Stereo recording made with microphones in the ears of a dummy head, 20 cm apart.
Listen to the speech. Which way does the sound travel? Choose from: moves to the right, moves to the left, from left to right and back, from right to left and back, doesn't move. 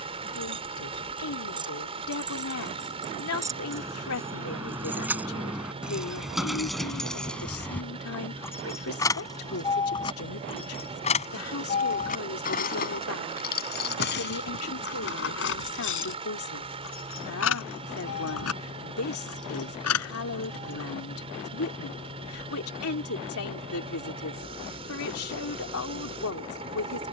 doesn't move.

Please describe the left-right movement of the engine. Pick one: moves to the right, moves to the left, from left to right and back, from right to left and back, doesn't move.
doesn't move.